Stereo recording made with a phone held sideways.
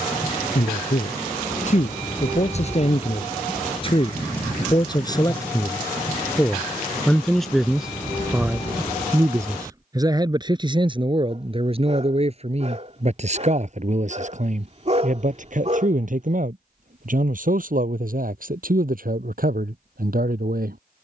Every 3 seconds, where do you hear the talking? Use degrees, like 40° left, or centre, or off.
50° left, 30° left, centre, 30° right, 50° right, 60° right, 60° right.